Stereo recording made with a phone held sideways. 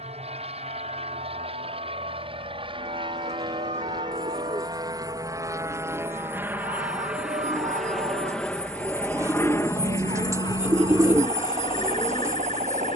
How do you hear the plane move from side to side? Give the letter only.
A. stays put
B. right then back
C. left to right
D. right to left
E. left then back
D.